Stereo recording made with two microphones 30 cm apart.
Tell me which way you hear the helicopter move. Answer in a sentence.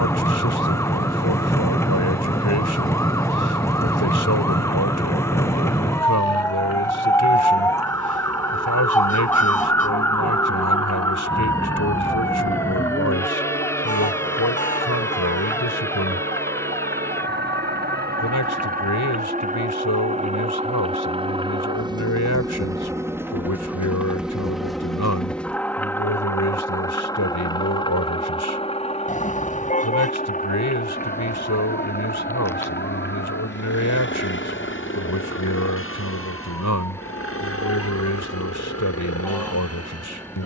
In this clip you hear the helicopter go from the right side to the left.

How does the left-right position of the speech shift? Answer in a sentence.
You can hear the speech stay put.